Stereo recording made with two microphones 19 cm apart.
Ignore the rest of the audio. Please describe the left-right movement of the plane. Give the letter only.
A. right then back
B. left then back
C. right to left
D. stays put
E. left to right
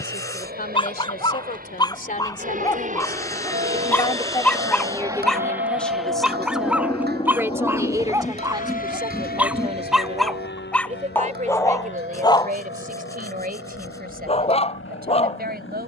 C.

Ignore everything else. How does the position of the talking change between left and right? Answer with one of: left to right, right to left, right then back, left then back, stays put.
left to right.